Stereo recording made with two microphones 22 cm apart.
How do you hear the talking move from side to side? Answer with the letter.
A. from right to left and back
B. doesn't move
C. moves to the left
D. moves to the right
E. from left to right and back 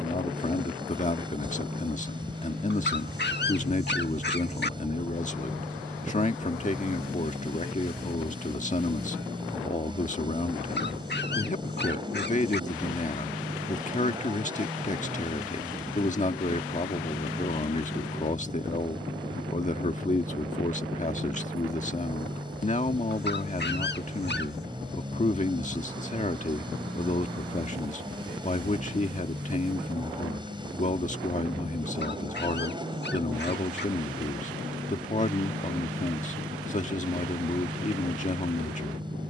B.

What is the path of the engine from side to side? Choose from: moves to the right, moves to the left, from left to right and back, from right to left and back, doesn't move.
doesn't move.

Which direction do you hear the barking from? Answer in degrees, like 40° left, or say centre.
50° left.